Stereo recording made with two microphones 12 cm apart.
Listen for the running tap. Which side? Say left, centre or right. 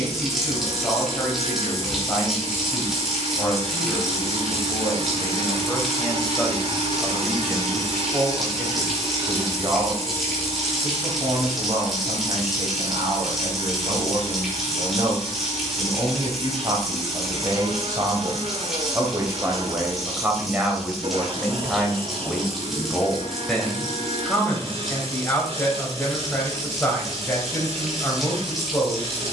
centre.